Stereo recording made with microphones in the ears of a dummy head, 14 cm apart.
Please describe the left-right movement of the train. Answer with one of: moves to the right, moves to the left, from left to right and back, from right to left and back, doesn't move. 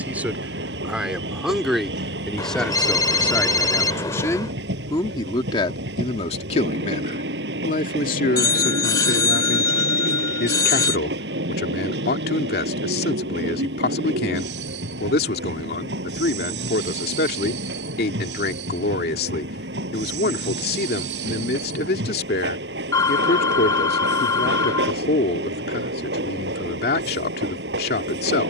doesn't move.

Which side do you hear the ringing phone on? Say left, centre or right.
left.